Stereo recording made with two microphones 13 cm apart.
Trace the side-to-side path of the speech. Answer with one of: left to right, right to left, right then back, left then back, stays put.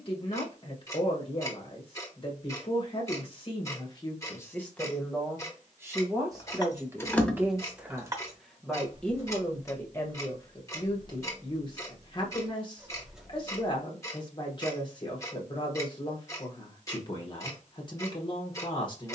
right then back.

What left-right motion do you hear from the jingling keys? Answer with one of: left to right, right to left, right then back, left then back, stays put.
right then back.